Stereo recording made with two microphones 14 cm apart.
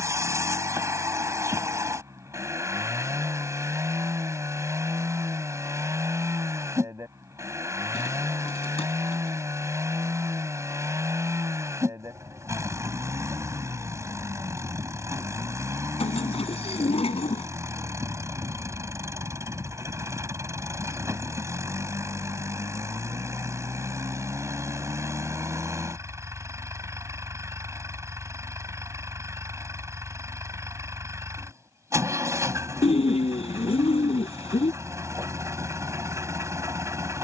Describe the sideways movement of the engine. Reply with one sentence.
In this clip you hear the engine stay put.